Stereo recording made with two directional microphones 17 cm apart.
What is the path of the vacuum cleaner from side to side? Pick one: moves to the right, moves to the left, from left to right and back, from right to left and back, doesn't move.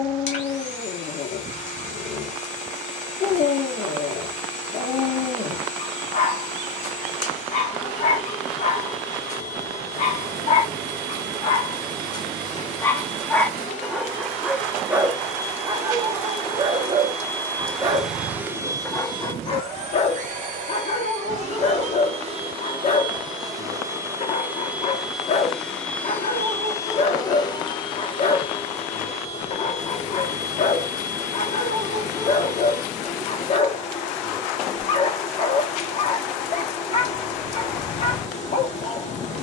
from left to right and back.